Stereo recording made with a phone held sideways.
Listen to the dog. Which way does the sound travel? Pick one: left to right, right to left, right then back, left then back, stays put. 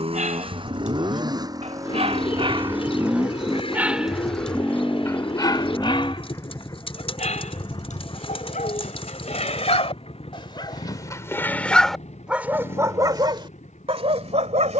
left then back.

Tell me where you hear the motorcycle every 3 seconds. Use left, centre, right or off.
right, centre, left, left, left.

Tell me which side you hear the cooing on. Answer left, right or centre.
left.